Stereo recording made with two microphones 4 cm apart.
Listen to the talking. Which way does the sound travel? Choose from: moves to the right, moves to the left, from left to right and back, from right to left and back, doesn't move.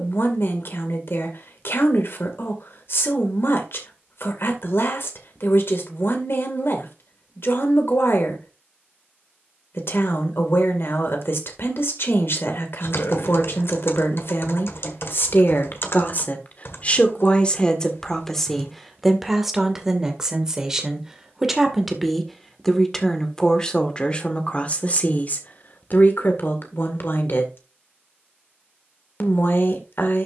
from left to right and back.